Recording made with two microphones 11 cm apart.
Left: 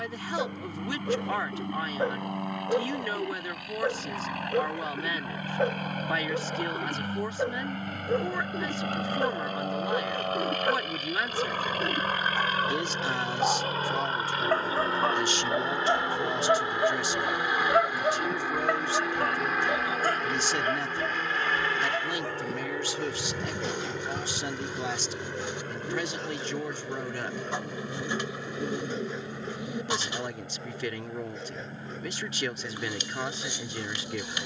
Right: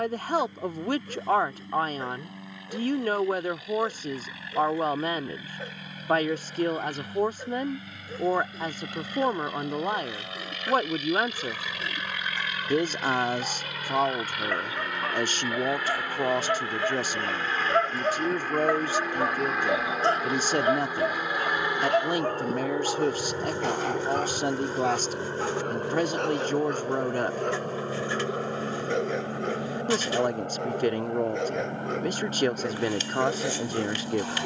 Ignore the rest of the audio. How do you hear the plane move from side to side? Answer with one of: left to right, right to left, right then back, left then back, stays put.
left to right.